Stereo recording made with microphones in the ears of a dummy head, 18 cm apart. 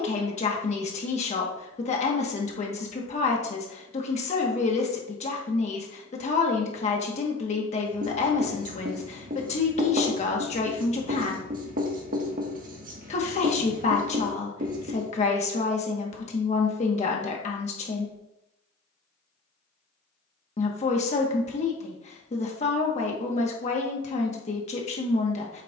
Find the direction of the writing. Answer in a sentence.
In this clip you hear the writing on the right.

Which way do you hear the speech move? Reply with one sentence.
In this clip you hear the speech stay put.